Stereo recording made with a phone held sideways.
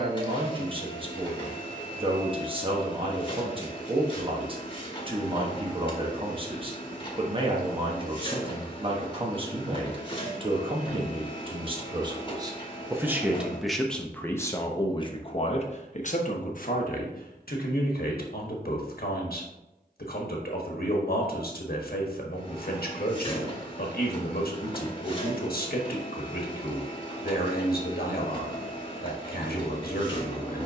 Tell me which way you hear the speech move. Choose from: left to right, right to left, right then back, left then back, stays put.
right to left.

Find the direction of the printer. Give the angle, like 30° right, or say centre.
30° left.